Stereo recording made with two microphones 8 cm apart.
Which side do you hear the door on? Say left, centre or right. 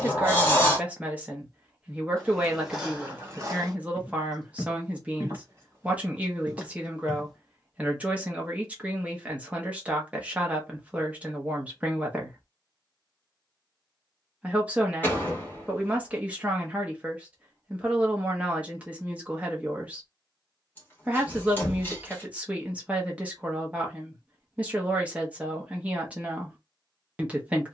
left.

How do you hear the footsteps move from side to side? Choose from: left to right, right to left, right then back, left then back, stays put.
right then back.